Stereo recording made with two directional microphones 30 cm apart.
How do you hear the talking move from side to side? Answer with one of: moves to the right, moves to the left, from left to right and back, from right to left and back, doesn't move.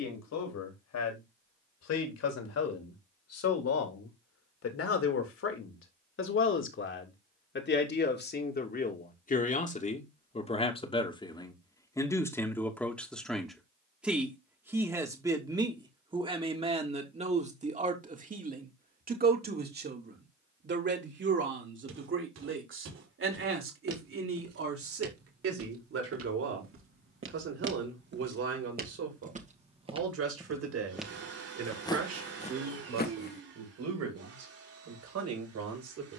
moves to the right.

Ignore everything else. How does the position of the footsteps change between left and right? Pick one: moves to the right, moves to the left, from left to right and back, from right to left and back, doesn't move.
moves to the left.